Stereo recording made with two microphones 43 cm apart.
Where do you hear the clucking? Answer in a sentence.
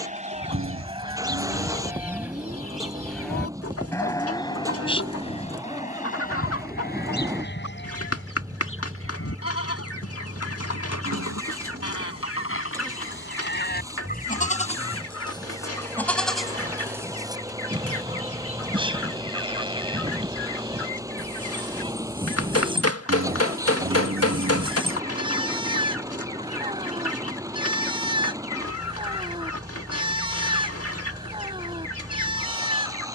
You can hear the clucking on the left.